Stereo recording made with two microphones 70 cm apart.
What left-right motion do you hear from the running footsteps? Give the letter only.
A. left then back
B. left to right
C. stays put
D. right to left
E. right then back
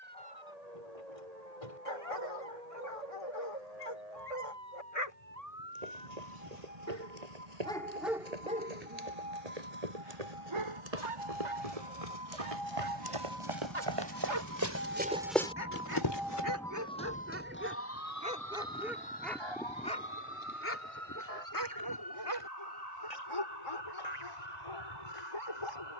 D.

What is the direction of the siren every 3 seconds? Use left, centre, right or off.
right, right, right, right, right, centre, left, left, left.